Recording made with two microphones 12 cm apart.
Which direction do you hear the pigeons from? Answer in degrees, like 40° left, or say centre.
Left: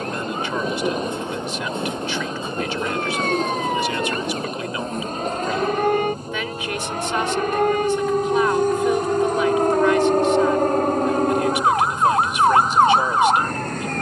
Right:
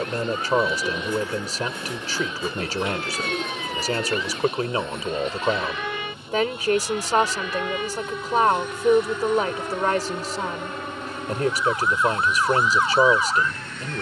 20° left.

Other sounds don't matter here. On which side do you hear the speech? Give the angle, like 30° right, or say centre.
40° right.